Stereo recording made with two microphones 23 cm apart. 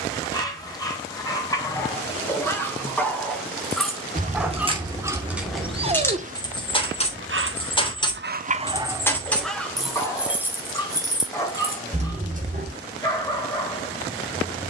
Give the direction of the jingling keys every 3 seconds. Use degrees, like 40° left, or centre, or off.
off, 20° right, 20° left, 10° right, 30° right.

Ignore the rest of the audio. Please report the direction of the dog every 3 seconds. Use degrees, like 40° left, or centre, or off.
10° left, 10° right, 40° right, 10° left, 10° left.